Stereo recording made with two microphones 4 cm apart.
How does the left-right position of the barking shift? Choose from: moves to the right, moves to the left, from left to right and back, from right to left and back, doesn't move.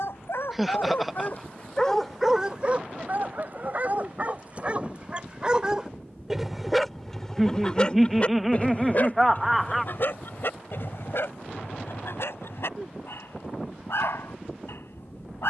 from left to right and back.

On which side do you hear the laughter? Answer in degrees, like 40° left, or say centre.
centre.